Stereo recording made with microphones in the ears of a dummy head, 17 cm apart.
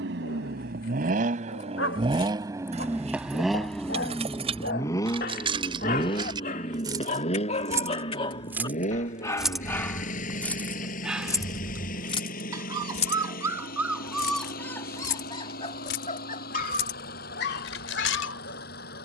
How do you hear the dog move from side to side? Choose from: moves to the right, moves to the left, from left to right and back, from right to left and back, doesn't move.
from left to right and back.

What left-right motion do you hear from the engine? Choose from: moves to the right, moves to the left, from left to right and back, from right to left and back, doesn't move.
moves to the left.